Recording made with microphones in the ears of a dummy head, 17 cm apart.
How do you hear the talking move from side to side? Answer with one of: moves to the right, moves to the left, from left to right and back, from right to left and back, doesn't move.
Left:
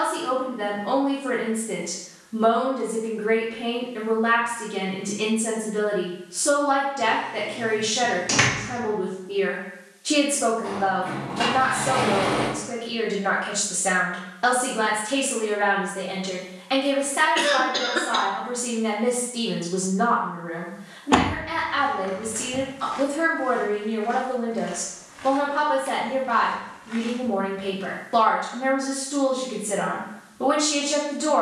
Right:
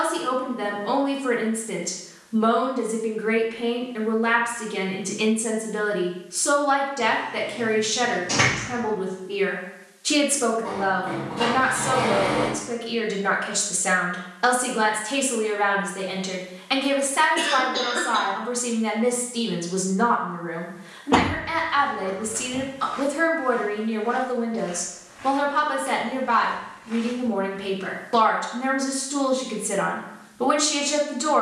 doesn't move.